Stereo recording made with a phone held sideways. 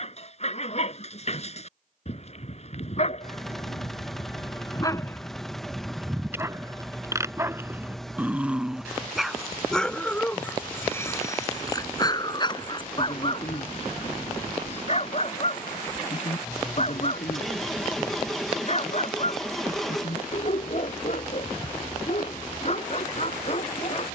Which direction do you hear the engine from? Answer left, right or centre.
centre.